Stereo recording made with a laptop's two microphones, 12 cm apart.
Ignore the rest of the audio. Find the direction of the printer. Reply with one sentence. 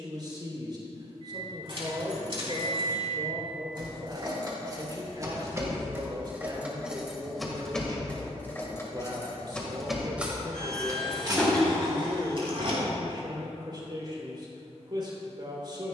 In this clip you hear the printer in the centre.